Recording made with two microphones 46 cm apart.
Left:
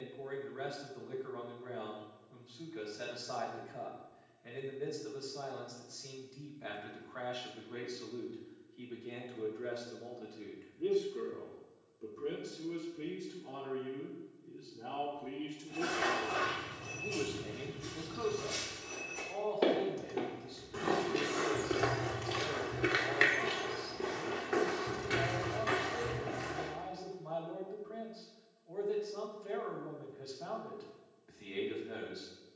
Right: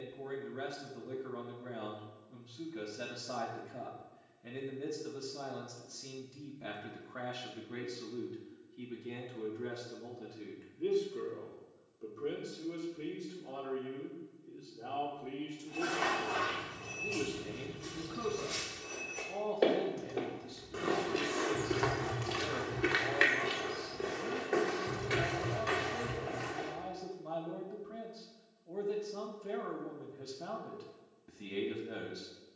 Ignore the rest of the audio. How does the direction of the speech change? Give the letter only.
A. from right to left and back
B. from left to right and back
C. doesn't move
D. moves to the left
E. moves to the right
A.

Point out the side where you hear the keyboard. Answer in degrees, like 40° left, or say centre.
centre.